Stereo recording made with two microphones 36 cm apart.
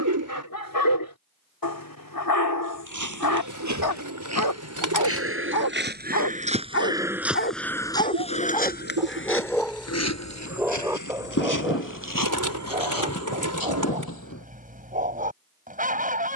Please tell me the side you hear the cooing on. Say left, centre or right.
right.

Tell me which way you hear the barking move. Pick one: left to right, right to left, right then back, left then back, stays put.
left to right.